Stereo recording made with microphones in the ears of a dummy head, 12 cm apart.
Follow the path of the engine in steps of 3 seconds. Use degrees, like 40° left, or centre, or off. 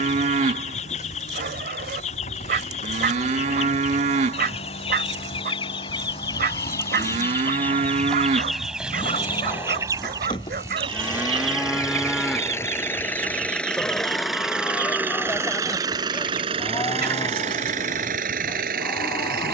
50° left, 50° left, 40° left, 30° left, 10° left, 40° right, 70° right.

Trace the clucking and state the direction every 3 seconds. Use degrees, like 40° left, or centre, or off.
50° left, 40° left, 10° left, 30° right, 60° right, 70° right, 70° right.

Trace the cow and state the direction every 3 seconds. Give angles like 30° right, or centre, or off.
50° right, 50° right, 50° right, 20° right, 10° left, 20° left, 30° left.